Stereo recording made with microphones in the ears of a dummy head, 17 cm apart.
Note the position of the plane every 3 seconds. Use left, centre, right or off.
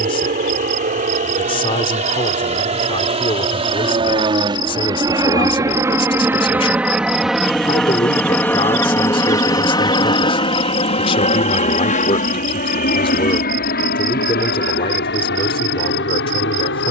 right, right, centre, left, left, left.